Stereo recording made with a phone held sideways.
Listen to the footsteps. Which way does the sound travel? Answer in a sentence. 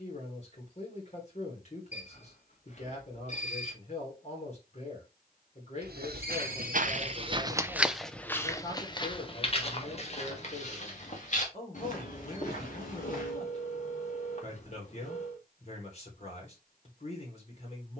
In this clip you hear the footsteps go from the right side to the left.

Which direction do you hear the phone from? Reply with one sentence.
In this clip you hear the phone on the left.